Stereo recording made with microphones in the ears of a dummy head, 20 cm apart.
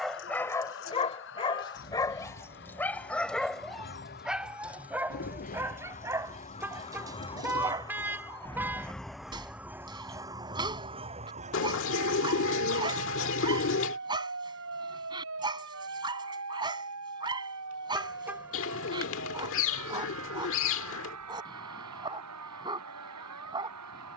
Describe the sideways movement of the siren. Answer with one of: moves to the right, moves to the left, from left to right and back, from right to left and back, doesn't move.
moves to the right.